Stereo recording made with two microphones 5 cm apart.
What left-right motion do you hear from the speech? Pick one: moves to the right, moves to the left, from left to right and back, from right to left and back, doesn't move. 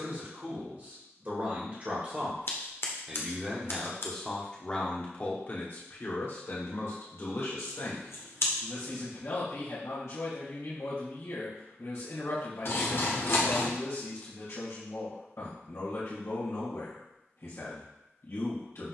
moves to the left.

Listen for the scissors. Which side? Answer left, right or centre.
left.